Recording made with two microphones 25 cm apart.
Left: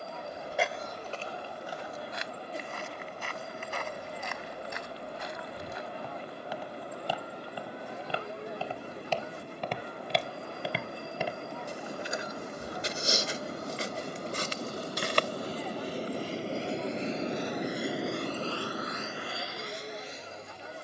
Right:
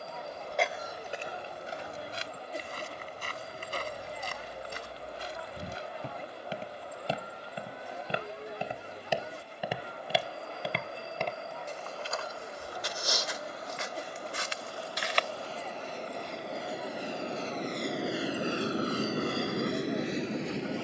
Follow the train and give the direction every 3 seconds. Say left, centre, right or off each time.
left, left, left, left, left, left, right.